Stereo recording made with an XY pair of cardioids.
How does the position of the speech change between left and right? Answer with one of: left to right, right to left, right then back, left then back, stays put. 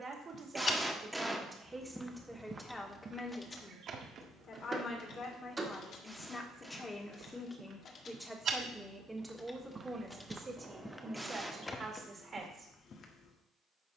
left then back.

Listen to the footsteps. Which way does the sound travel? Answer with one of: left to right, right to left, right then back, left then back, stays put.
right then back.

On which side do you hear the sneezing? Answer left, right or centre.
centre.